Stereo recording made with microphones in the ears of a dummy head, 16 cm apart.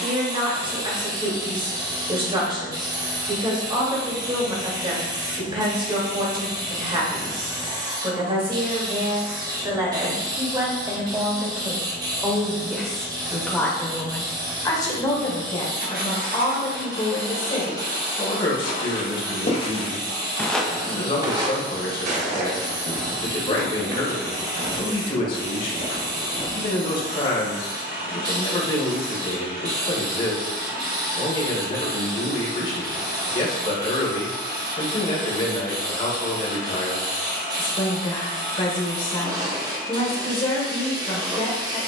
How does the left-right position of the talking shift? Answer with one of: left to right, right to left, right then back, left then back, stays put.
right to left.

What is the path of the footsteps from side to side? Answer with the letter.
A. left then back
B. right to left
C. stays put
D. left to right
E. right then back
D.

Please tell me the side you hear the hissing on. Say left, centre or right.
right.